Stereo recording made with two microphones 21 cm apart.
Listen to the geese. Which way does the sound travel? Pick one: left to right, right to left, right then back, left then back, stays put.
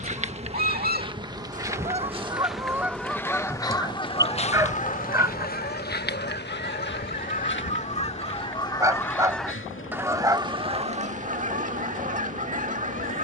left then back.